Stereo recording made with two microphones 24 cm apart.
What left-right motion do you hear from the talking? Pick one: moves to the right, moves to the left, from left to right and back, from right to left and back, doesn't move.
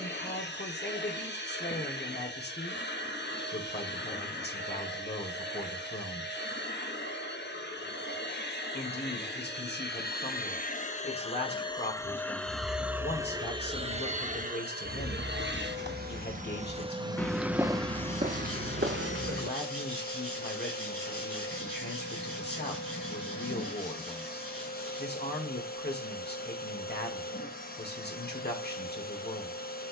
doesn't move.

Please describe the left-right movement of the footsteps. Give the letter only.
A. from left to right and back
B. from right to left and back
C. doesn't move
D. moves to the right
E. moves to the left
D.